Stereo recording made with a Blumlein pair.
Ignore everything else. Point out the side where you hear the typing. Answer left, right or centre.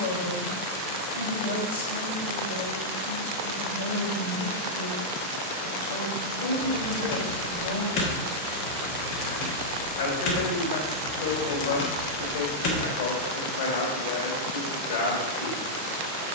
left.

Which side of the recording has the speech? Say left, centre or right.
left.